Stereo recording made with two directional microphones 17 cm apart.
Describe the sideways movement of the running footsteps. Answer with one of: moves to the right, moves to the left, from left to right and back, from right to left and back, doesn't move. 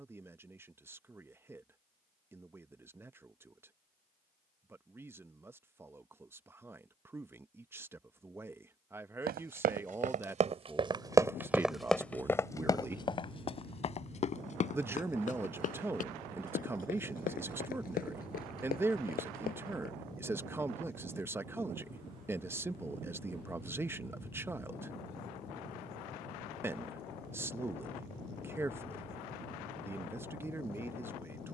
moves to the left.